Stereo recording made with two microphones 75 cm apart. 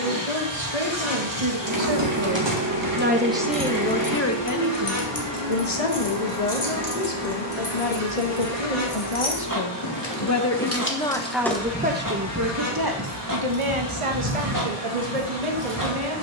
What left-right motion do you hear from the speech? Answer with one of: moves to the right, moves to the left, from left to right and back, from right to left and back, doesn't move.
from right to left and back.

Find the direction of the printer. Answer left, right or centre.
right.